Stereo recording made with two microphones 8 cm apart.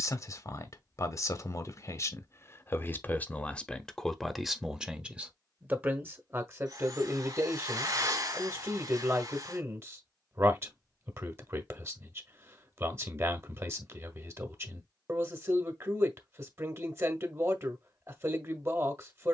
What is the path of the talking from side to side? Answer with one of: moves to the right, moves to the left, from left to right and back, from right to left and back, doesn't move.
moves to the right.